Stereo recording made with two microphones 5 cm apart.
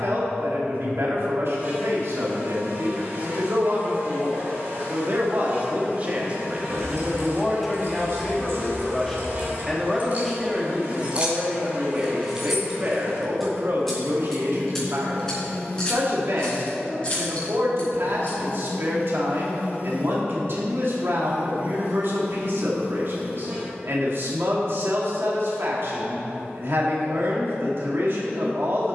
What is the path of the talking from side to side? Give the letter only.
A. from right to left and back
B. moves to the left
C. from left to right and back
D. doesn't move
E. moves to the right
A.